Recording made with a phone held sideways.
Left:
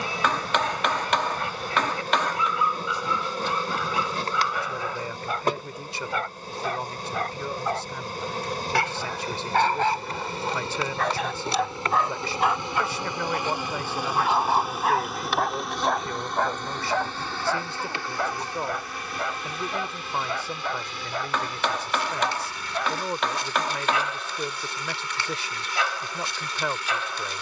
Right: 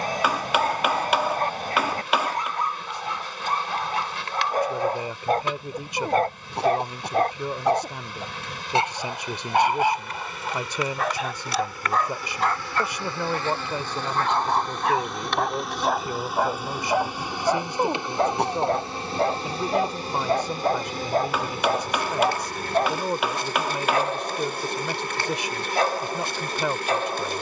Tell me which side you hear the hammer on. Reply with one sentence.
In this clip you hear the hammer in the centre.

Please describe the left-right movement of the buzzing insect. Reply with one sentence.
You can hear the buzzing insect go from the left side to the right.